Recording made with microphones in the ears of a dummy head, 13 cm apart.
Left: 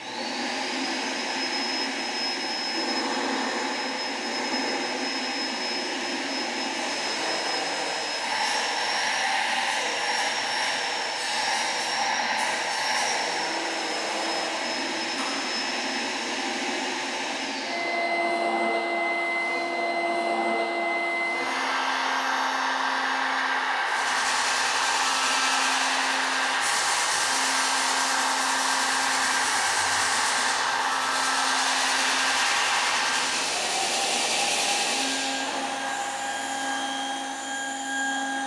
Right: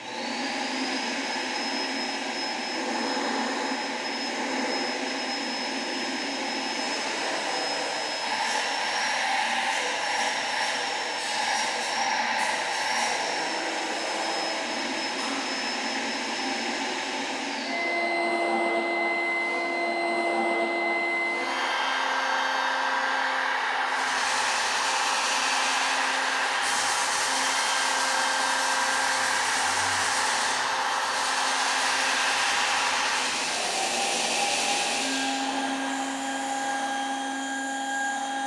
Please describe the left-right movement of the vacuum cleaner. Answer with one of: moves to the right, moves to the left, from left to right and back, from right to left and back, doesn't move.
doesn't move.